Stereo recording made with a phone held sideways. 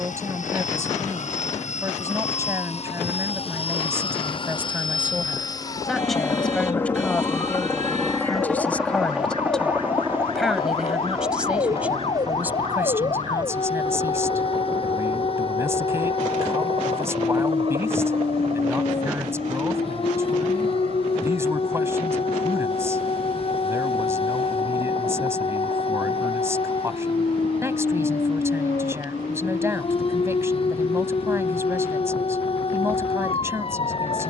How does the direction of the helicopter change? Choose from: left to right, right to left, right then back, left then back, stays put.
left to right.